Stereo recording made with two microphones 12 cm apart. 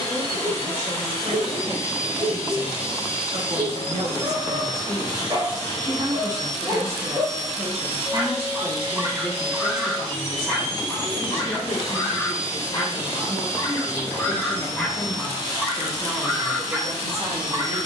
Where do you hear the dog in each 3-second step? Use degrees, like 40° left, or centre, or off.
40° right, 40° right, 40° right, centre, 20° left, 10° right.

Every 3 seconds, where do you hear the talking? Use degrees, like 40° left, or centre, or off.
60° right, 50° right, 10° right, 30° left, 40° left, 30° right.